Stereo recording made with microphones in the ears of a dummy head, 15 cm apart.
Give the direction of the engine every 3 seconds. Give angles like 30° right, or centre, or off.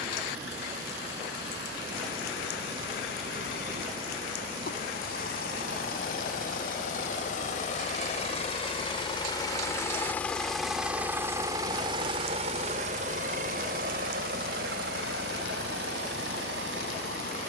70° left, 60° left, 50° left, centre, 50° right, 70° right.